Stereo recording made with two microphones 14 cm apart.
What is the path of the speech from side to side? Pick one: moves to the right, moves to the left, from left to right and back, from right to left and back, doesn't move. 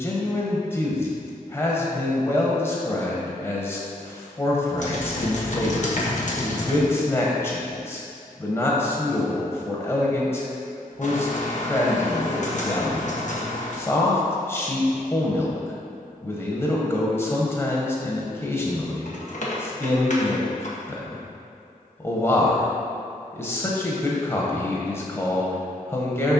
doesn't move.